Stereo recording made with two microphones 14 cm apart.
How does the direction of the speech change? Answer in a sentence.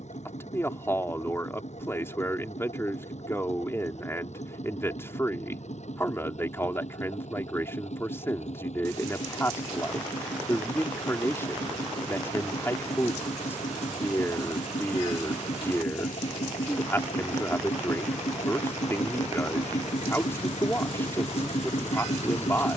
You can hear the speech stay put.